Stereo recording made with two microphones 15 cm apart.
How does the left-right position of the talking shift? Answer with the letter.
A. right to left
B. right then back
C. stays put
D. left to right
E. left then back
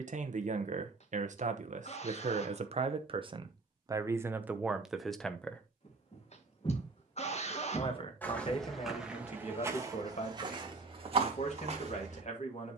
A.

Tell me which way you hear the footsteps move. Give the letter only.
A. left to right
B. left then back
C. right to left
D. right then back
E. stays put
A.